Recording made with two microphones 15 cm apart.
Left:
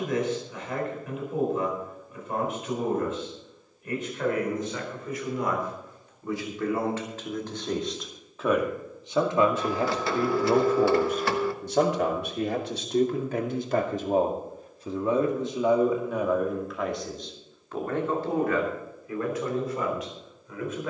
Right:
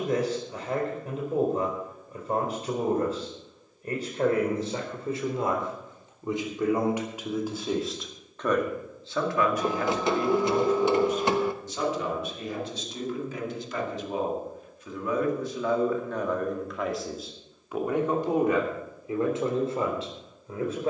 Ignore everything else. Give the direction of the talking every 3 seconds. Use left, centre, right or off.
right, right, centre, left, left, centre, right.